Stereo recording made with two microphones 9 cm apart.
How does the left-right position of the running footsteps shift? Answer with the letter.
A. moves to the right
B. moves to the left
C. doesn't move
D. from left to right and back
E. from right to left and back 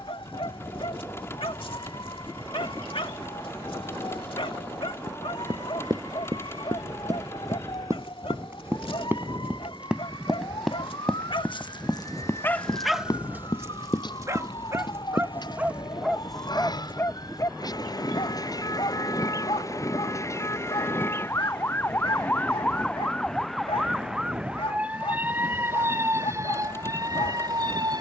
B.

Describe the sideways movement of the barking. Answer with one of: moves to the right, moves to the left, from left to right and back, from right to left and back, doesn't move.
from left to right and back.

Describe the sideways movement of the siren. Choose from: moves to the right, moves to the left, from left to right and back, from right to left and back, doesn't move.
moves to the right.